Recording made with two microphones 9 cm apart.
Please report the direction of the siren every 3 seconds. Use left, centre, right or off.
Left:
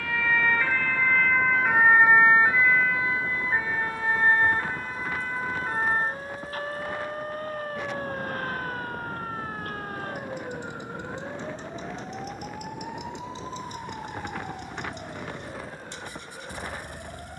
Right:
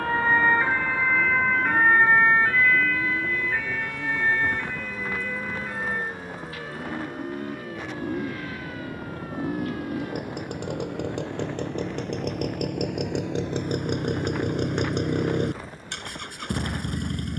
centre, left, left, left, left, left.